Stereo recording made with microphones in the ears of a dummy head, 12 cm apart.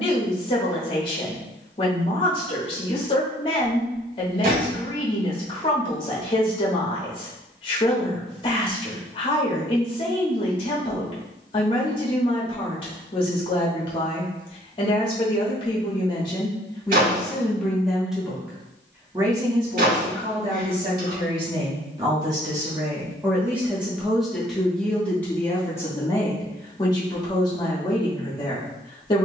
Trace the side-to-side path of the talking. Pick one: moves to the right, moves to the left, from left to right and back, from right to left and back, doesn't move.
from left to right and back.